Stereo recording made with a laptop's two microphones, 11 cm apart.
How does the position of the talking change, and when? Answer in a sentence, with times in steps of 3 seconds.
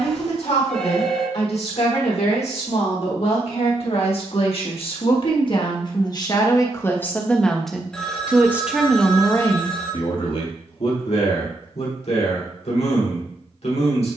In this clip you hear the talking on the left from 0 s, in the centre from 6 s and on the left from 9 s.